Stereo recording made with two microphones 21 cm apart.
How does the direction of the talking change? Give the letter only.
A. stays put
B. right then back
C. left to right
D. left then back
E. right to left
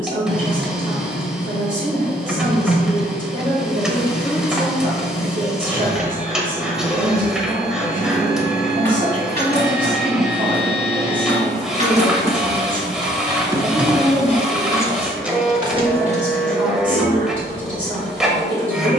A.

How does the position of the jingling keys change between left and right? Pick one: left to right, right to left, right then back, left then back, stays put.
left then back.